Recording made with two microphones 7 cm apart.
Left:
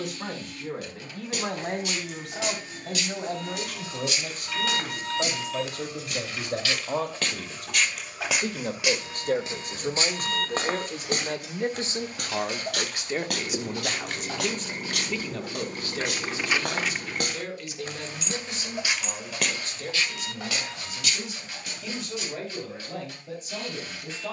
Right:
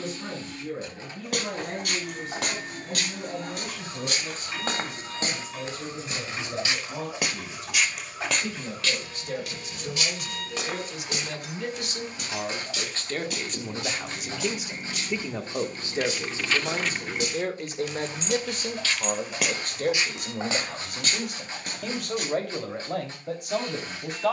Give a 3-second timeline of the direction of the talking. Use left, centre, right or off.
left, left, left, left, centre, right, right, right.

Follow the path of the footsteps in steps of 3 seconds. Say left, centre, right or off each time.
right, right, centre, left, left, left, centre, right.